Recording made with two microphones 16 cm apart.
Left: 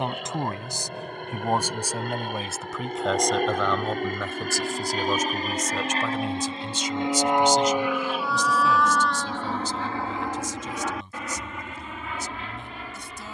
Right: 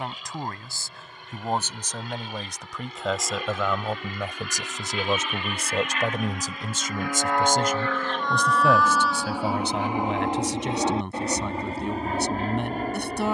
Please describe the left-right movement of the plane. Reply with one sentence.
In this clip you hear the plane move to the right.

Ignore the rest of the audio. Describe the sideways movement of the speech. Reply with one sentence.
You can hear the speech move from left to right.